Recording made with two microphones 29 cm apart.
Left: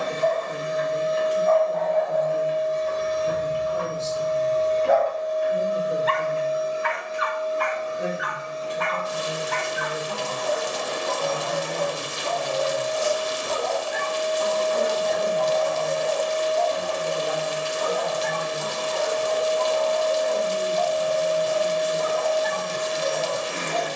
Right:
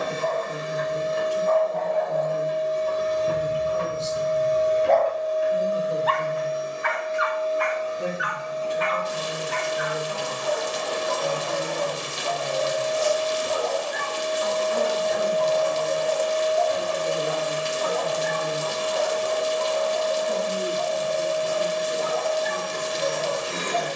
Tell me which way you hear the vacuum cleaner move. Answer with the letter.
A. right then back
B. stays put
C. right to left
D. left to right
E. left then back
E.